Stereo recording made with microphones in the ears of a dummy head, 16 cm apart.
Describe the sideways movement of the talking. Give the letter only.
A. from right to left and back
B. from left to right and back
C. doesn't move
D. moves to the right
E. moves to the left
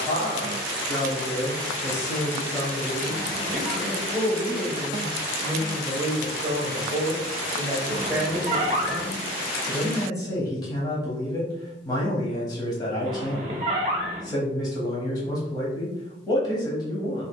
B.